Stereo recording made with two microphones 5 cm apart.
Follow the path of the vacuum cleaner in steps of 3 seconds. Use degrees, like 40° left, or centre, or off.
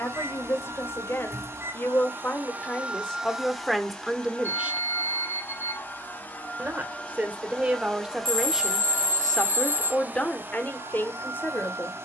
50° right, 20° left, 20° left, 40° right.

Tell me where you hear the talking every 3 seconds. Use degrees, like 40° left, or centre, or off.
50° left, centre, 20° right, 30° left.